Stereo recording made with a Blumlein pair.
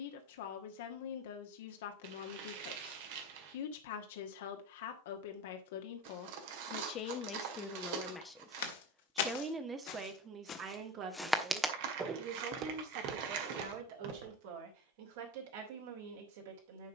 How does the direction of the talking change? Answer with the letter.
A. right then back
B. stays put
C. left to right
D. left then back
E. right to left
C.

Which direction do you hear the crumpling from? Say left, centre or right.
right.